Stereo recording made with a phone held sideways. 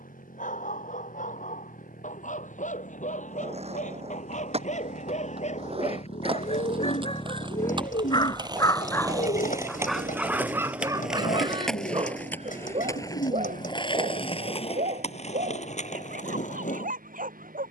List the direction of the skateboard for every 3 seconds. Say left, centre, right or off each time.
off, right, right, centre, left, left.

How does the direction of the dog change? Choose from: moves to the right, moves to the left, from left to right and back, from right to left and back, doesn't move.
moves to the right.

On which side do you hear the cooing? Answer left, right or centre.
left.